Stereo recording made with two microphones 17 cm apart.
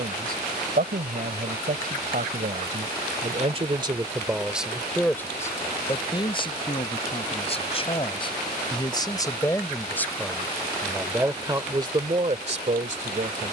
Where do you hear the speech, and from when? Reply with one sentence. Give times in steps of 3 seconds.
You can hear the speech on the right from 0 s, in the centre from 3 s, on the left from 6 s, in the centre from 9 s and on the right from 12 s.